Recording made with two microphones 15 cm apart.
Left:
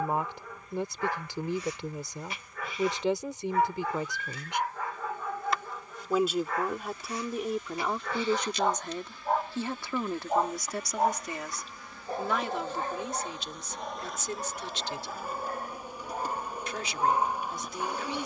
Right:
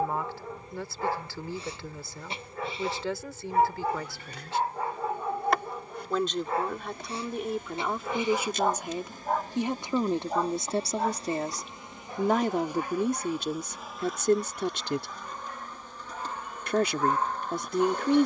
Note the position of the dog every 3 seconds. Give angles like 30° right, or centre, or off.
30° right, 30° right, 20° right, 20° left, 50° left, 30° left.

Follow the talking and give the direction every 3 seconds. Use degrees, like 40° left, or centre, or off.
20° left, 20° left, centre, 30° right, 50° right, 60° right.